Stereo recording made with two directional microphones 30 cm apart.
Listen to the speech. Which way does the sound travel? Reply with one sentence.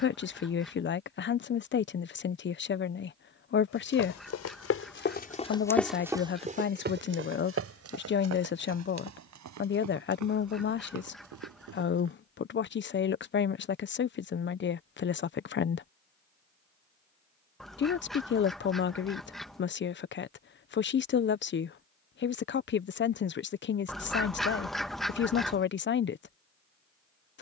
You can hear the speech stay in one place.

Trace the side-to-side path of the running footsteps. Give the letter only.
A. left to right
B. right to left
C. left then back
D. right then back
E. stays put
A.